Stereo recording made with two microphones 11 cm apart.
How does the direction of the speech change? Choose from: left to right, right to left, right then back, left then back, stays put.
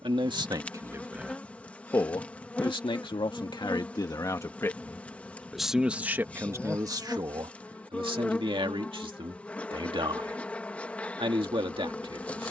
left then back.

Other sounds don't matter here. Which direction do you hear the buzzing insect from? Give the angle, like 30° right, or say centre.
10° left.